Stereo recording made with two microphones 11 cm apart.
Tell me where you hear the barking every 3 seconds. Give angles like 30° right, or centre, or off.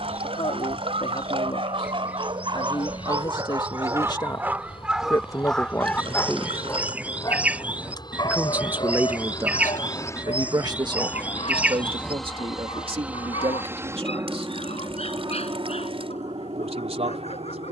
60° right, 10° right, 30° left, 60° left, 70° left, 70° left.